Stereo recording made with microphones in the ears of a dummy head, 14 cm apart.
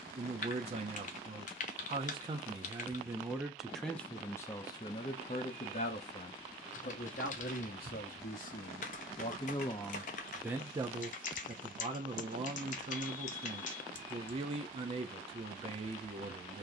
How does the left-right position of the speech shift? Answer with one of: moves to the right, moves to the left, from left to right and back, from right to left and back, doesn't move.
from right to left and back.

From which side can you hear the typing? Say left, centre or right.
left.